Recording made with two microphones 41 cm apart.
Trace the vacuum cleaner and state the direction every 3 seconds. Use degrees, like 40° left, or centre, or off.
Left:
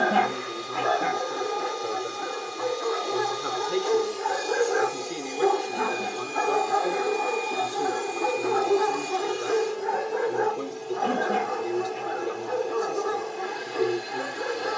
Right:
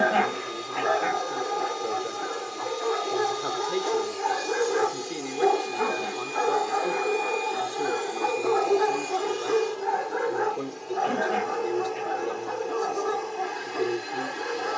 40° right, 30° right, 10° left, 50° left, 50° left.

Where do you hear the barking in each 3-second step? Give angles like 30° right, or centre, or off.
50° right, 10° right, 40° left, 30° right, 50° right.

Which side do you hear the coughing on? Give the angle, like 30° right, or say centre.
60° left.